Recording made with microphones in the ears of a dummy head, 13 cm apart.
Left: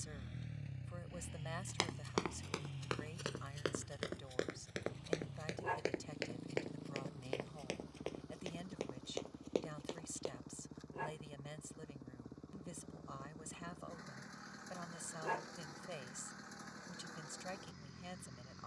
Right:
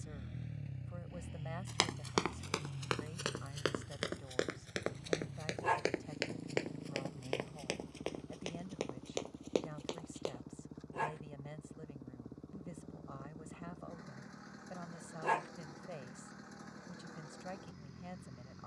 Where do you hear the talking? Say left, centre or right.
left.